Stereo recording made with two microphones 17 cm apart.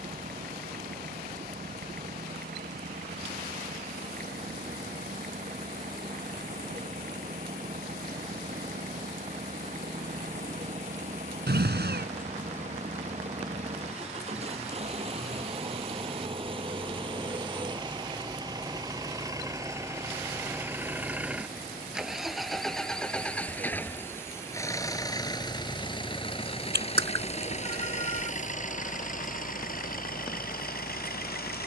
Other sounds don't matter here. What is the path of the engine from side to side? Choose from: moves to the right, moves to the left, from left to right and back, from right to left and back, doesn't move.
moves to the left.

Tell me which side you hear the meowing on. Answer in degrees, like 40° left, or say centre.
70° right.